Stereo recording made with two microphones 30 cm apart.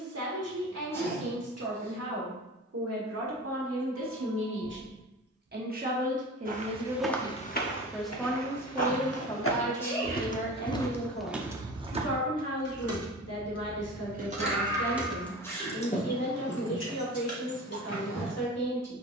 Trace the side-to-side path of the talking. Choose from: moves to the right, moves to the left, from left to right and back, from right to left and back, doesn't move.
moves to the left.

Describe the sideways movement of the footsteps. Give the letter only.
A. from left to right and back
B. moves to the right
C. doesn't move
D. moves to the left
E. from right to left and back
E.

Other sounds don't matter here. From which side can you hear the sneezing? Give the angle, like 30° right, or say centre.
10° left.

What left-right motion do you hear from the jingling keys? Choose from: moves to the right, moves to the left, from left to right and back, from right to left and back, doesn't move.
moves to the left.